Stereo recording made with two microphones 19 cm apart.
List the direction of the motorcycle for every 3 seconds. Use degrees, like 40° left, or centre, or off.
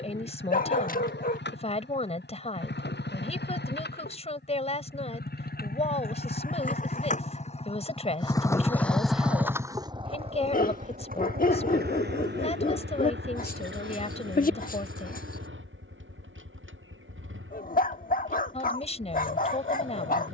70° left, 60° left, 30° left, 30° right, 70° right, 80° right, 80° right.